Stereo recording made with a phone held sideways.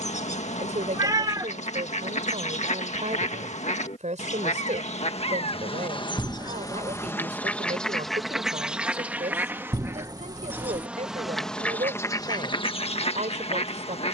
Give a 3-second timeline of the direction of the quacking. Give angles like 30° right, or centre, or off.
60° left, 50° left, 10° left, 10° right, 40° left.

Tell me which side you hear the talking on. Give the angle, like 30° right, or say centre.
60° right.